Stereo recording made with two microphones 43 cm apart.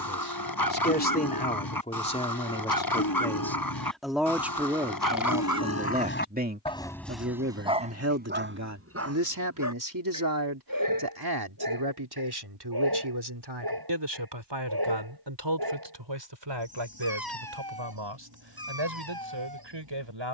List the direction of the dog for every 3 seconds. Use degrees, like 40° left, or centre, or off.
50° left, 50° left, centre, 50° right, 50° right, 60° right, 60° right.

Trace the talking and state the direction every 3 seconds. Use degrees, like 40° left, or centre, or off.
20° left, 10° right, 30° right, 50° right, 60° right, 70° right, 80° right.